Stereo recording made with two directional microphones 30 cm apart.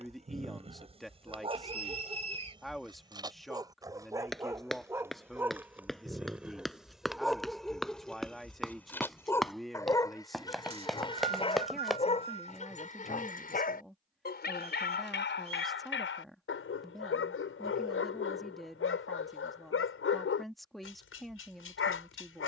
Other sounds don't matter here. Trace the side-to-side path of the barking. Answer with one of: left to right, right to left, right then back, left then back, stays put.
right to left.